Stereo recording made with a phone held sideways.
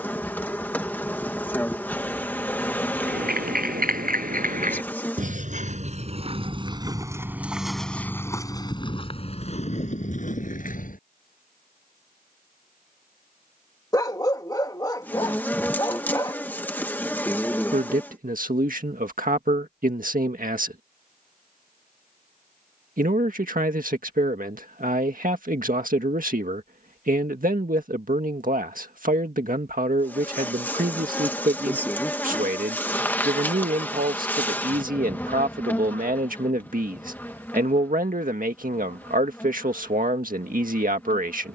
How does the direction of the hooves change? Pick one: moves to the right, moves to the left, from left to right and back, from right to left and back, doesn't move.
moves to the left.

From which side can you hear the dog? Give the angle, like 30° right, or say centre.
20° left.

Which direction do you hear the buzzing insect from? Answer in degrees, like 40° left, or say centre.
10° left.